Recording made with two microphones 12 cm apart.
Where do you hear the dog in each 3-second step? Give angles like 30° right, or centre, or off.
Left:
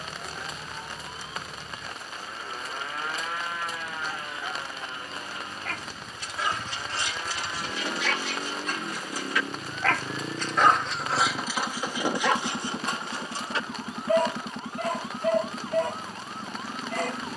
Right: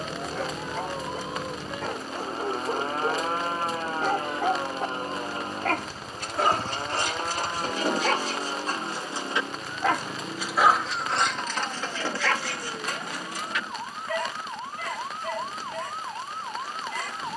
70° right, 60° right, 50° right, 10° right, 30° left, 50° left.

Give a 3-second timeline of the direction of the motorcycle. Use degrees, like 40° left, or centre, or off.
70° right, 50° right, 20° right, 20° left, 40° left, 50° left.